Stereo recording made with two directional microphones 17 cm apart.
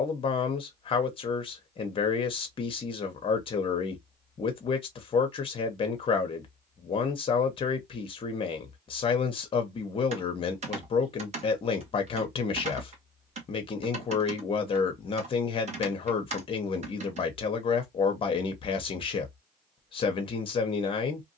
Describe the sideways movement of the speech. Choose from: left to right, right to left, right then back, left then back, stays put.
stays put.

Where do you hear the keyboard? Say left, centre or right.
right.